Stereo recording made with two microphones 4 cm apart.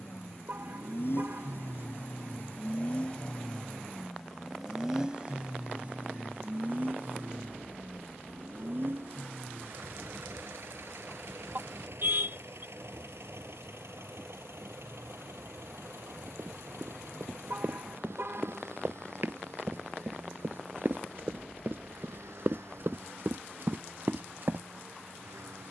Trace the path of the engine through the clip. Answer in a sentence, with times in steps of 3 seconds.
In this clip you hear the engine on the left from 0 s, in the centre from 3 s and on the right from 6 s.